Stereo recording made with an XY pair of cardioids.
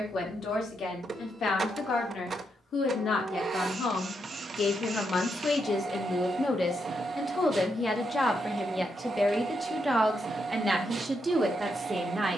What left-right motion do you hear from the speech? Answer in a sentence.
In this clip you hear the speech move to the right.